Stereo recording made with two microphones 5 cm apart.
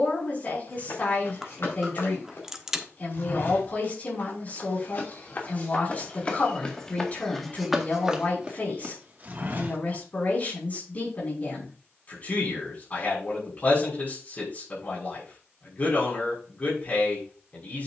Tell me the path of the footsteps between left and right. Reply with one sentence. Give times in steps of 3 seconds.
In this clip you hear the footsteps on the left from 0 s, in the centre from 6 s, on the right from 9 s and not at all from 12 s.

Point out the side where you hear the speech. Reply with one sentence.
You can hear the speech on the left.